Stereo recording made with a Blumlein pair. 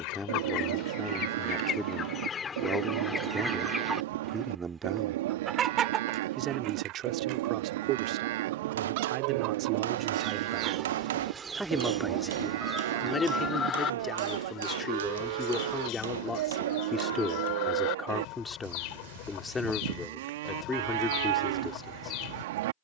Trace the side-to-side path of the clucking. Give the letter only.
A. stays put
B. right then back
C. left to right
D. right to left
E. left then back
B.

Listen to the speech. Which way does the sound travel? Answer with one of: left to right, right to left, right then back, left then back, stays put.
right then back.